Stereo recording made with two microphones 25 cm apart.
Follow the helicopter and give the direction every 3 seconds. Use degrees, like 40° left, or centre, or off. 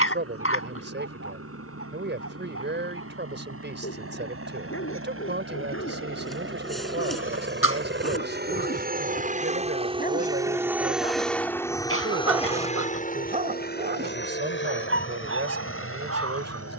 80° right, 70° right, 50° right, 10° right, 30° left, 50° left.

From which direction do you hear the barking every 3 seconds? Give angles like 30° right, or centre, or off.
60° left, 60° left, 50° left, 30° left, 30° right, 70° right.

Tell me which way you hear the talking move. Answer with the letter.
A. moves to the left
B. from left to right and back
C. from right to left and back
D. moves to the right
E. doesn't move
E.